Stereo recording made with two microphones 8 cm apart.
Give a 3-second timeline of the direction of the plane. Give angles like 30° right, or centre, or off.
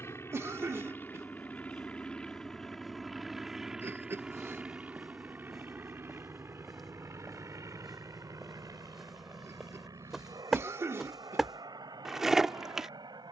20° left, 10° right, 40° right, 50° right, 60° right.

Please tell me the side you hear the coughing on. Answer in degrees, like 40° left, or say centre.
40° right.